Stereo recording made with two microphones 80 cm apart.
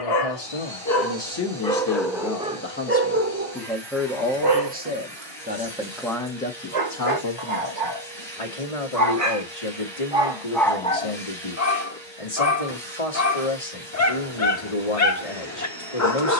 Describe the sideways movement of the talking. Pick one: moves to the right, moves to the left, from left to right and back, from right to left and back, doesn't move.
from left to right and back.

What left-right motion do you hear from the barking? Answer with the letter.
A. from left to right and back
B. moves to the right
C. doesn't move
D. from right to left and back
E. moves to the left
A.